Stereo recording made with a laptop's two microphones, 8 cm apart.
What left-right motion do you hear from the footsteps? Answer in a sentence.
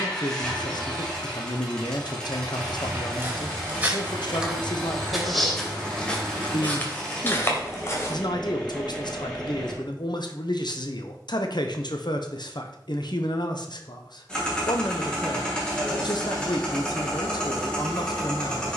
In this clip you hear the footsteps move to the left.